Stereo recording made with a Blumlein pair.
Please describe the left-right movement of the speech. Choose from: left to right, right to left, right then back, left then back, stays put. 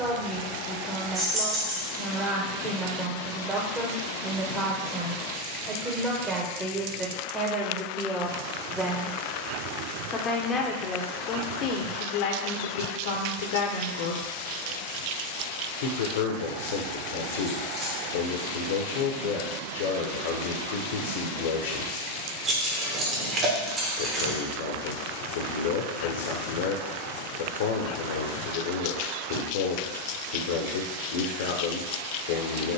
right to left.